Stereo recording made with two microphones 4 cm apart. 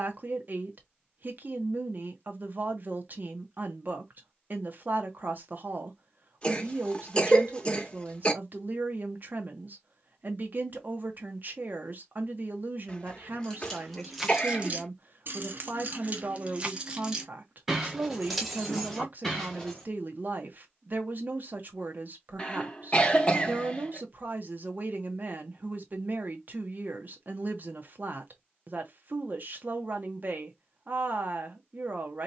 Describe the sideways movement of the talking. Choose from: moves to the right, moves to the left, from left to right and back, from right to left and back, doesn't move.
doesn't move.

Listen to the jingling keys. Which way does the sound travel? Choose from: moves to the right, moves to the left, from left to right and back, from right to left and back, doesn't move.
from left to right and back.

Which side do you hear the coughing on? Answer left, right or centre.
left.